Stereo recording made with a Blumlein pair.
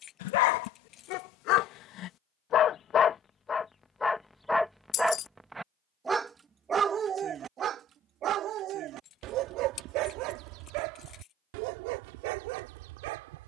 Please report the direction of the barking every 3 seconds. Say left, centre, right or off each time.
left, centre, right, right, right.